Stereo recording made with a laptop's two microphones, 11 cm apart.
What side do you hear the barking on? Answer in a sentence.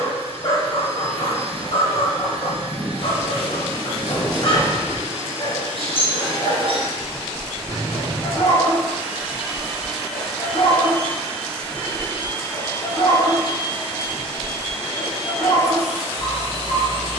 In this clip you hear the barking on the left.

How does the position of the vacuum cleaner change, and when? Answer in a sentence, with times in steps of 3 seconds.
You can hear the vacuum cleaner on the right from 0 s, in the centre from 9 s, on the left from 12 s and on the right from 15 s.